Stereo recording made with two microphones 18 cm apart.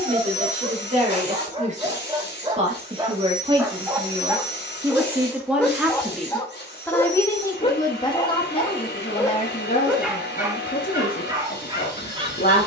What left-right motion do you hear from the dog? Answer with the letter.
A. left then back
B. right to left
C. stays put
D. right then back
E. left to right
A.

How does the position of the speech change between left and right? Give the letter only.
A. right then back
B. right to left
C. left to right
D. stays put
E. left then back
B.